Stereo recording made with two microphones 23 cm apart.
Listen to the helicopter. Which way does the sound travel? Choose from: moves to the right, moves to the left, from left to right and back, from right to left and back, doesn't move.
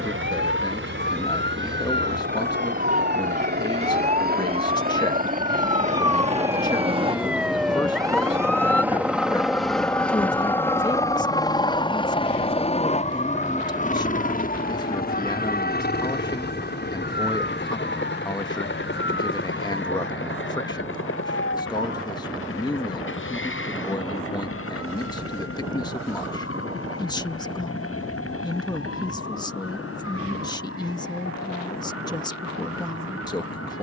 moves to the left.